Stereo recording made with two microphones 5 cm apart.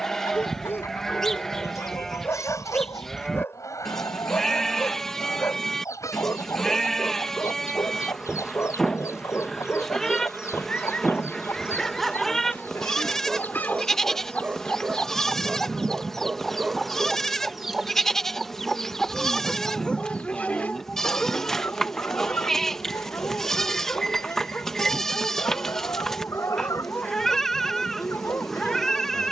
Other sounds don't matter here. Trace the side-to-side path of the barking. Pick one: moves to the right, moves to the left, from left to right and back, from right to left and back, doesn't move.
from left to right and back.